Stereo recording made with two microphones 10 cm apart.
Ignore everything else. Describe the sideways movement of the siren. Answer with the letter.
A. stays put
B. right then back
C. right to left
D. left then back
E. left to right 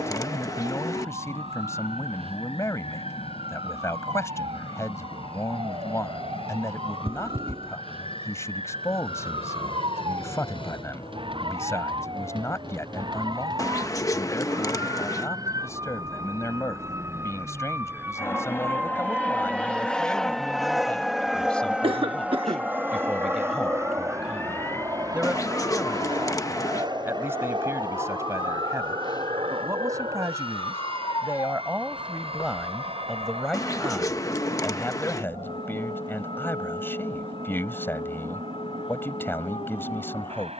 C.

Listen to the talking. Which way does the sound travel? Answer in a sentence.
In this clip you hear the talking move from left to right and back again.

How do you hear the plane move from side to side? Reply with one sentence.
In this clip you hear the plane move from left to right.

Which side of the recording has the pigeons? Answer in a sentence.
In this clip you hear the pigeons on the left.